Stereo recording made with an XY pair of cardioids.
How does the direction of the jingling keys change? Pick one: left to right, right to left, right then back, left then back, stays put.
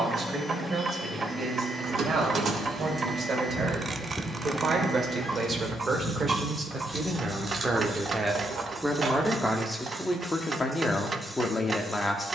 left then back.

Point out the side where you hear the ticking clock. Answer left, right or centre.
right.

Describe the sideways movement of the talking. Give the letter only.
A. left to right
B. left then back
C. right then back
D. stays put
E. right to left
E.